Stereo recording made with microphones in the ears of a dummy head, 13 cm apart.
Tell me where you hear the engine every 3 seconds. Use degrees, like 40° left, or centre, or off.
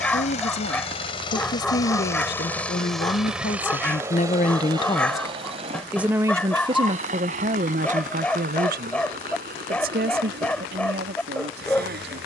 30° left, 20° right, 50° right, 60° right.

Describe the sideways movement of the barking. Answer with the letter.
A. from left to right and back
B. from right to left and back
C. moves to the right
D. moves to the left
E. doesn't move
E.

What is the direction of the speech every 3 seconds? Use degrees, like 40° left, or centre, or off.
70° left, 40° left, 40° right, 70° right.